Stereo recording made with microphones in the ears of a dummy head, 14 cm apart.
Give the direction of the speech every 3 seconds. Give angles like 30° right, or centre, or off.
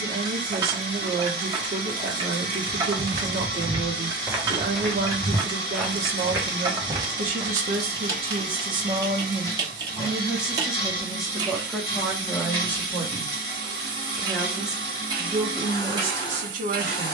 70° right, 70° right, 50° right, 10° right, 10° left, 40° right.